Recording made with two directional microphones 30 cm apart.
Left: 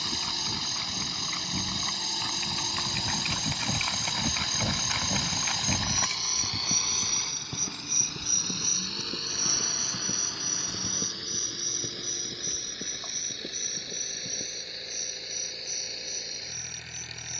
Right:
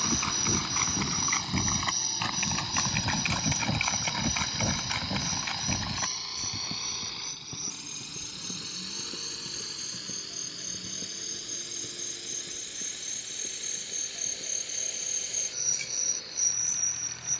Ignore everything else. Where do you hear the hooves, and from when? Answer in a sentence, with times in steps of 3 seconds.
You can hear the hooves on the right from 0 s, in the centre from 3 s, on the left from 6 s and not at all from 15 s.